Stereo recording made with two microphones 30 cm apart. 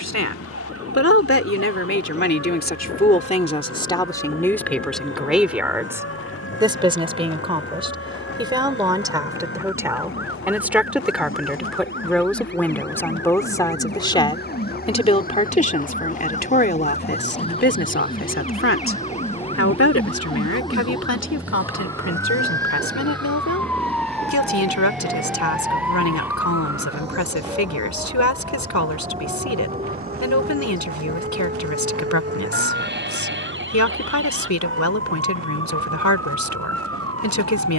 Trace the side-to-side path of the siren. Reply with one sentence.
You can hear the siren go from the left side to the right.